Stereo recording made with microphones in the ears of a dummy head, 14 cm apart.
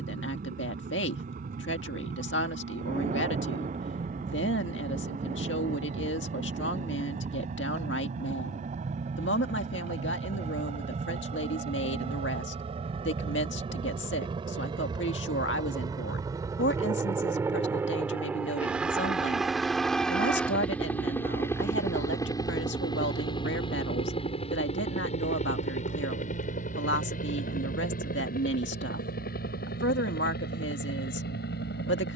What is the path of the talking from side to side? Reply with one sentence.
You can hear the talking stay put.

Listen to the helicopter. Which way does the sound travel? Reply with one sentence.
You can hear the helicopter travel towards the left.